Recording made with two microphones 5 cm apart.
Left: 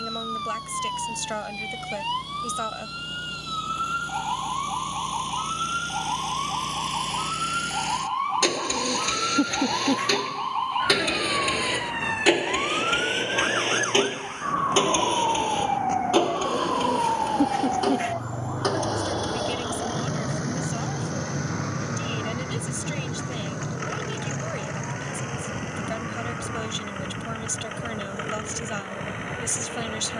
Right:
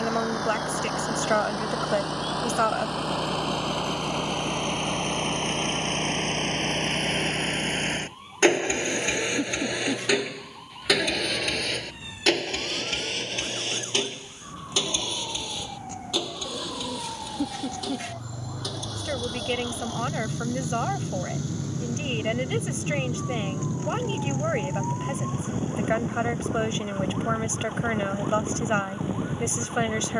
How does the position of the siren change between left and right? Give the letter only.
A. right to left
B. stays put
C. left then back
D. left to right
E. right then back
D.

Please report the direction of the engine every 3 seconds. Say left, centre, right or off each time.
right, right, right, centre, left, left, left, left, left, left.